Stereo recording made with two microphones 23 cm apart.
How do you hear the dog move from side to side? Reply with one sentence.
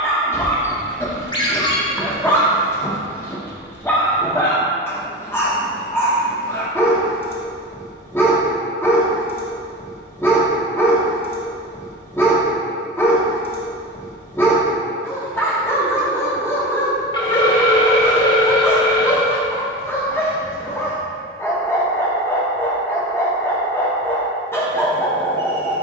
In this clip you hear the dog stay in one place.